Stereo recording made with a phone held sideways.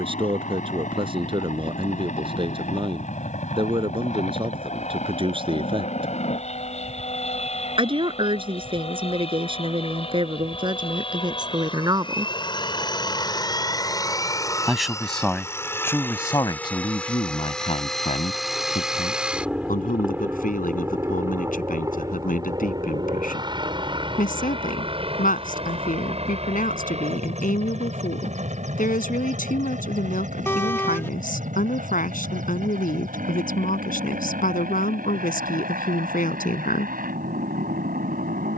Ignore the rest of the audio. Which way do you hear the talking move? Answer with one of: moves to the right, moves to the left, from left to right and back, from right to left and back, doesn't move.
moves to the left.